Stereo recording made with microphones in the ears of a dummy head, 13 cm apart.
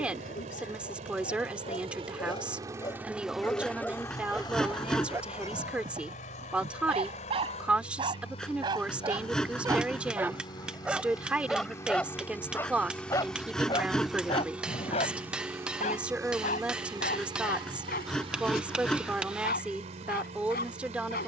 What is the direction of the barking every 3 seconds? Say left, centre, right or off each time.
left, centre, right, centre, left, left, left.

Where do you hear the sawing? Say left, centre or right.
centre.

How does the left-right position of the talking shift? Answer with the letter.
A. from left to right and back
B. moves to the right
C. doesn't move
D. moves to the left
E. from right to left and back
C.